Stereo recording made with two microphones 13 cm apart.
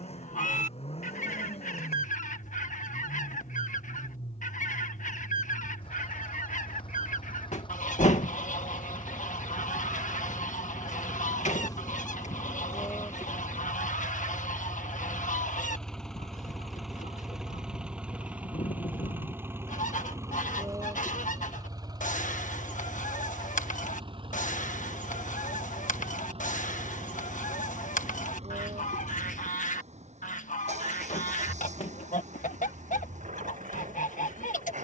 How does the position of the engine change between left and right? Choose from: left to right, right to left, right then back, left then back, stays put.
left to right.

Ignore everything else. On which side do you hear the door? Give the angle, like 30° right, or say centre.
70° left.